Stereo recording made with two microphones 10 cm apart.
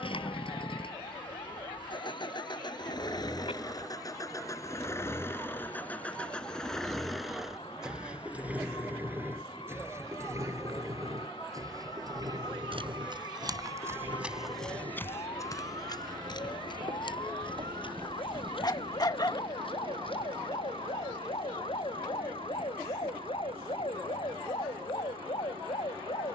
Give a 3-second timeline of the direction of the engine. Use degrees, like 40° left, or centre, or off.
60° left, 30° left, centre, 30° right, 50° right, 60° right, 60° right, 60° right, 70° right.